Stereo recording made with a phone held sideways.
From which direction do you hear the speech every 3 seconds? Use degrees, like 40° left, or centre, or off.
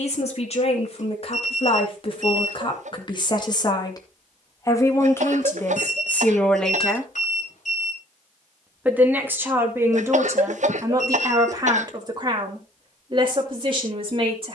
50° left, 20° left, centre, 20° right, 40° right.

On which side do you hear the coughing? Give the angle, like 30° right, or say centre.
60° right.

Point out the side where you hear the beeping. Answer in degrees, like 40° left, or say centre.
60° left.